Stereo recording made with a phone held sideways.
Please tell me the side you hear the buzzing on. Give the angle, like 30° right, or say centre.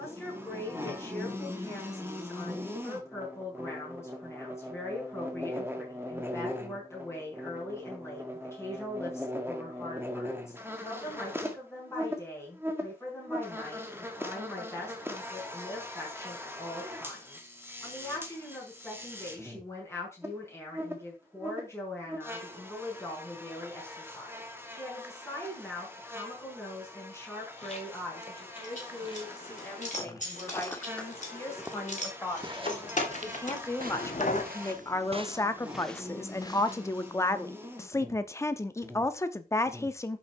10° right.